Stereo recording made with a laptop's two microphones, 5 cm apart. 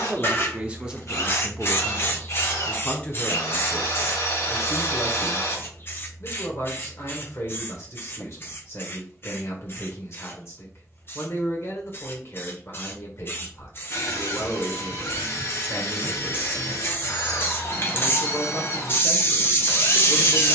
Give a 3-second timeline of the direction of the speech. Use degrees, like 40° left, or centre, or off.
10° right, 40° left, 50° left, 50° left, 50° left, 50° left, 50° left.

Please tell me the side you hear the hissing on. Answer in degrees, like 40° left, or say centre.
40° left.